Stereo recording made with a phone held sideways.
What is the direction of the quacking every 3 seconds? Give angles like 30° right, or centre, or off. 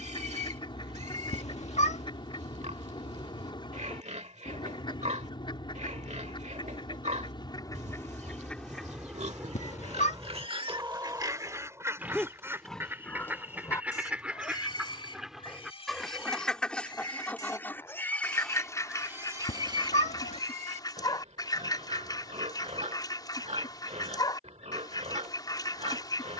40° left, 40° left, 20° left, 20° right, 10° right, centre, 30° left, 30° left, 30° left.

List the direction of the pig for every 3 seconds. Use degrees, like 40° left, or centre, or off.
60° right, 60° right, 60° right, 40° right, 20° left, 30° left, 20° right, 50° right, 50° right.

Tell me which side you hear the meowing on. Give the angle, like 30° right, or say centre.
50° left.